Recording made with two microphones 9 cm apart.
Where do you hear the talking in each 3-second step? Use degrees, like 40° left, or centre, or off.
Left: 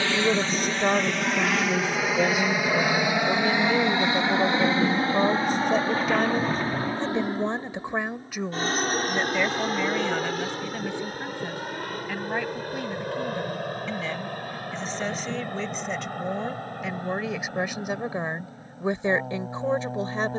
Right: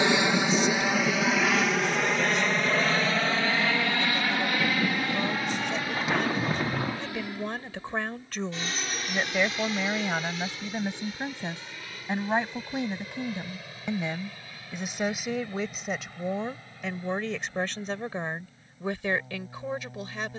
40° left, 40° left, 20° left, 10° right, 20° right, centre, 20° left.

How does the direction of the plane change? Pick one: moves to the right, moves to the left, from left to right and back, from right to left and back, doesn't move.
moves to the left.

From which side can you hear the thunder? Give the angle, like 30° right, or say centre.
10° right.